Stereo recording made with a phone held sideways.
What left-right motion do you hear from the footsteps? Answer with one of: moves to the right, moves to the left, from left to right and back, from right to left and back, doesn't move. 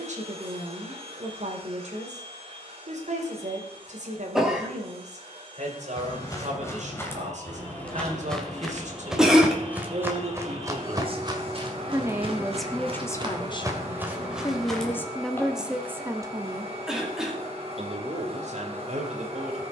from left to right and back.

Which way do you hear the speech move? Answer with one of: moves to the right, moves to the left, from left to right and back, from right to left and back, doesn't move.
from right to left and back.